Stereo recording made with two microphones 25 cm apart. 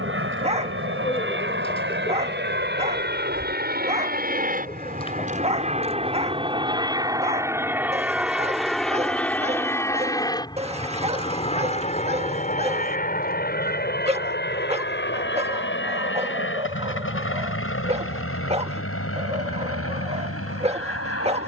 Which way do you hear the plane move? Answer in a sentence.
You can hear the plane go from the right side to the left.